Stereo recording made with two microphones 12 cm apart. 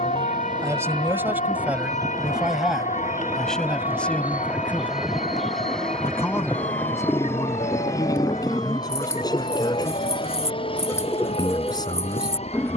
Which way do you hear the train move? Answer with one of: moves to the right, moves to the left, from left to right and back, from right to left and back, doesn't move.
moves to the left.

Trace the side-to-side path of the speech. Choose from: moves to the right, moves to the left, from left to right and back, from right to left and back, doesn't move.
moves to the left.